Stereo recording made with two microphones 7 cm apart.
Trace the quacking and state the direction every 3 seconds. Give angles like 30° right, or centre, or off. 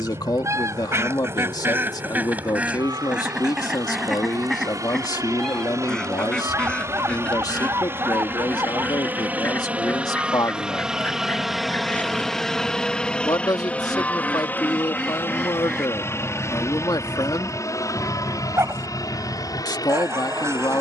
30° right, centre, 20° left, 20° left, 20° left, 10° right, 40° right.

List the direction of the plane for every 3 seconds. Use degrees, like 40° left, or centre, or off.
60° right, 50° right, 40° right, 10° right, 10° left, 40° left, 50° left.